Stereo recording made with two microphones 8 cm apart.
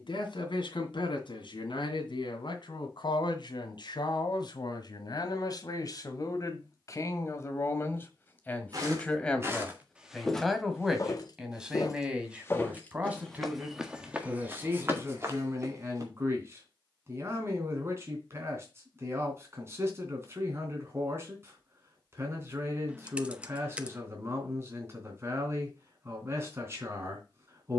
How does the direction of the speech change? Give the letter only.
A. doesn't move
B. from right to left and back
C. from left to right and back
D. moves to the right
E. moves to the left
D.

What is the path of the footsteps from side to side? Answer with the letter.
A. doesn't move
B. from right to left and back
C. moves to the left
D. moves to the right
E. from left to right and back
B.